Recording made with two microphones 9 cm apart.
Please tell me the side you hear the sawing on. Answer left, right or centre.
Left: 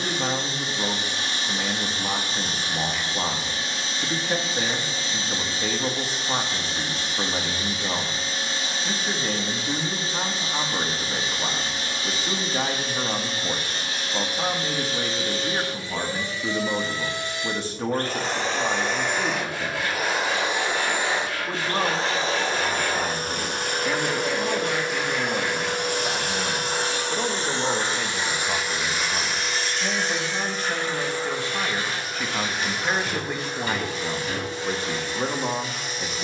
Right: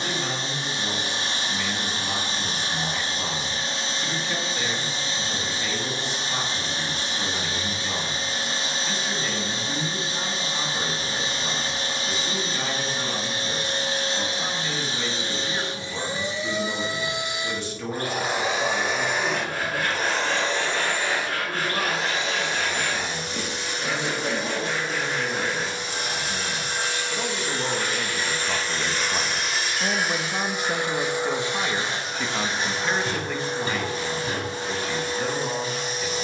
right.